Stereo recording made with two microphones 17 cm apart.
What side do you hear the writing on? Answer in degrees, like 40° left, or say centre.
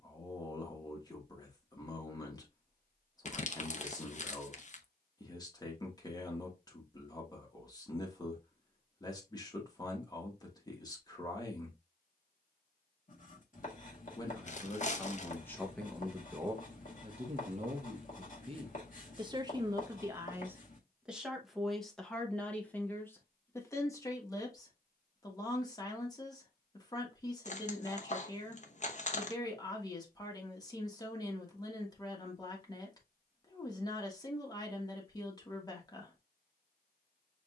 50° left.